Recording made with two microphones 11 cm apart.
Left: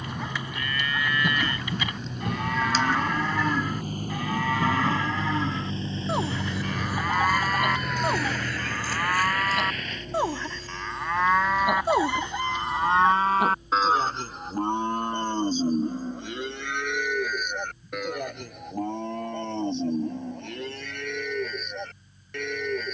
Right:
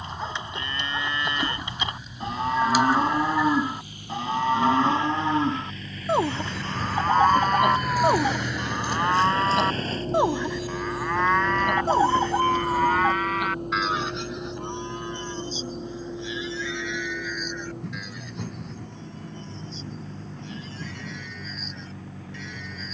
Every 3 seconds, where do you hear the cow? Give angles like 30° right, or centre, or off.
30° right, 30° right, 30° right, 10° right, 30° left, 50° left, 60° left, 60° left.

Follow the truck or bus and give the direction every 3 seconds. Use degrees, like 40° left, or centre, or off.
60° left, 40° left, centre, 40° right, 60° right, 70° right, 80° right, 80° right.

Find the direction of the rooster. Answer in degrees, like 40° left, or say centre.
30° right.